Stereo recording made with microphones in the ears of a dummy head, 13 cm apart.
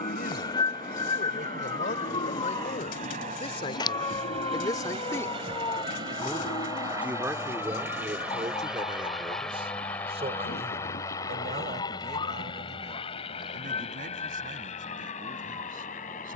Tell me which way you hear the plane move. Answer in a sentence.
In this clip you hear the plane go from the right side to the left.